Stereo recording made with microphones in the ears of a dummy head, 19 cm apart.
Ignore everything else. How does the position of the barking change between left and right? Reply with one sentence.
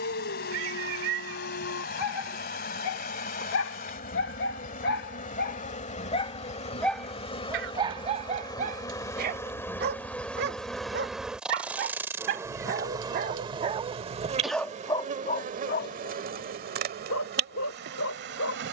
You can hear the barking move from left to right and back again.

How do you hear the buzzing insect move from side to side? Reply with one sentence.
You can hear the buzzing insect move to the right.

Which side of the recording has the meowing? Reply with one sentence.
You can hear the meowing on the right.